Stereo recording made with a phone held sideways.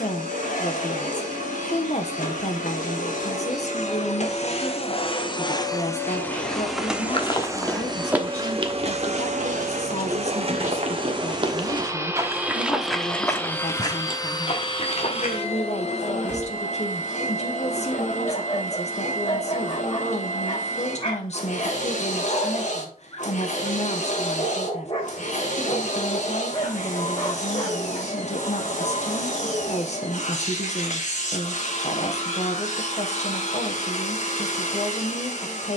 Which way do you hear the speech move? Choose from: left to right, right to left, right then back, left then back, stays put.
stays put.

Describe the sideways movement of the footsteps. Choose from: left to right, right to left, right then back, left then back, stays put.
right then back.